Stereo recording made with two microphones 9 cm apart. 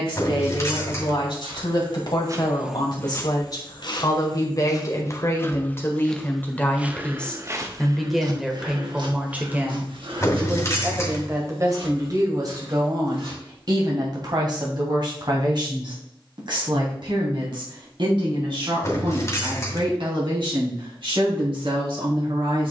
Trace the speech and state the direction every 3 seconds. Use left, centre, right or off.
left, left, centre, right, right, right, right, right.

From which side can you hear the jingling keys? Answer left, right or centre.
left.